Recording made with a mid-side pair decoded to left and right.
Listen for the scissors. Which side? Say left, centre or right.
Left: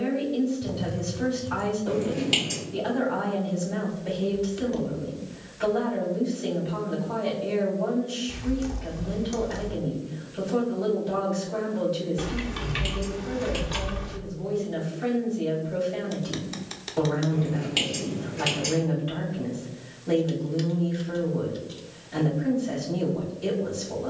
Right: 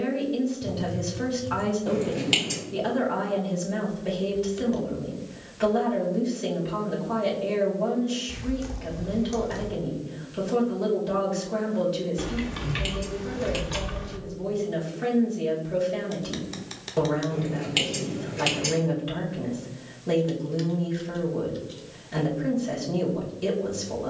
right.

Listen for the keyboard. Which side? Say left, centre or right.
centre.